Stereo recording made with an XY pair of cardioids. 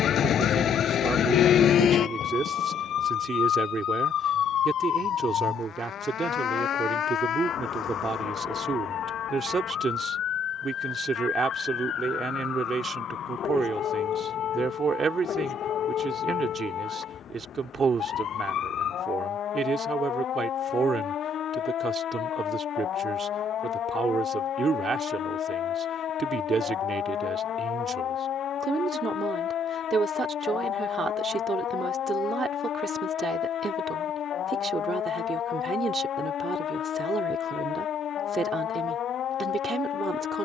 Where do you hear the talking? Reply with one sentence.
In this clip you hear the talking on the right.